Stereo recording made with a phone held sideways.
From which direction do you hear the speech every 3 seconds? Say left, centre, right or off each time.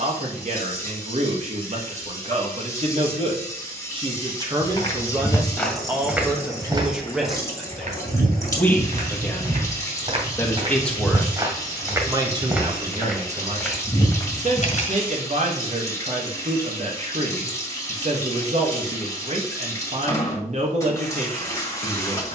right, right, centre, centre, right, right, right, right.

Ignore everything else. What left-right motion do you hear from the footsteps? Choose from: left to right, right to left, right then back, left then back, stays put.
right then back.